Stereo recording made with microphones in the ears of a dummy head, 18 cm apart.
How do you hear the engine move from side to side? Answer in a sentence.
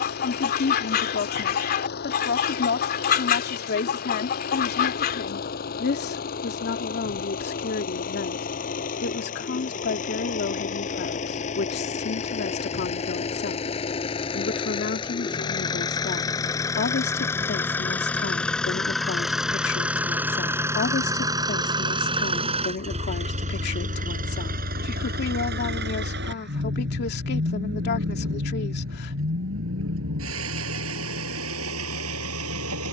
In this clip you hear the engine move from left to right.